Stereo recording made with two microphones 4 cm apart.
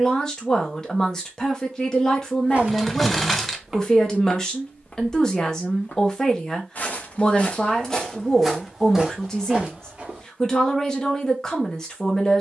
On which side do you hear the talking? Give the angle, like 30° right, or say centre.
10° left.